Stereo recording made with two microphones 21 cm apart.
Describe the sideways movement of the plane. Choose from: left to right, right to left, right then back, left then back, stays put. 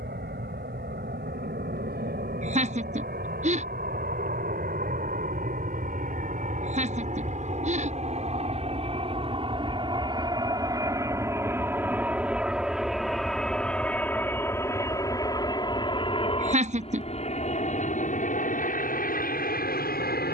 right to left.